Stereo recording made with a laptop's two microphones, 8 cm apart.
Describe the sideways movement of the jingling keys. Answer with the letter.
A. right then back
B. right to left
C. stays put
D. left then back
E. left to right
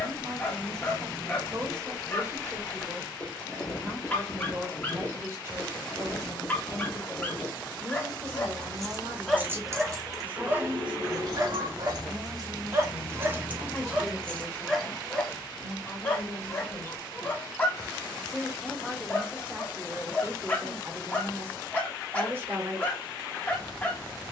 A.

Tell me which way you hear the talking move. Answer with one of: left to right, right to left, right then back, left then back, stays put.
left then back.